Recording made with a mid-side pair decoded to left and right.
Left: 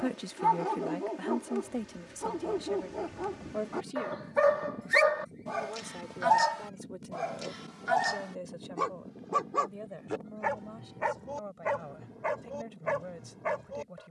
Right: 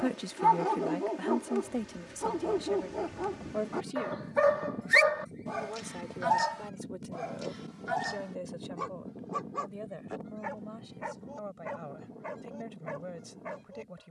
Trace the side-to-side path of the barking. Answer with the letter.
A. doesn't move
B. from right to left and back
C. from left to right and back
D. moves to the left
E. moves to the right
D.